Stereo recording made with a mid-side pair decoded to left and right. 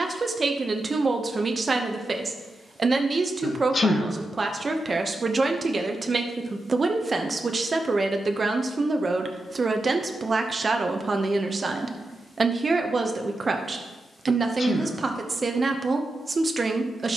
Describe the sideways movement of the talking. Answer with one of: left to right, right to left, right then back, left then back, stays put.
stays put.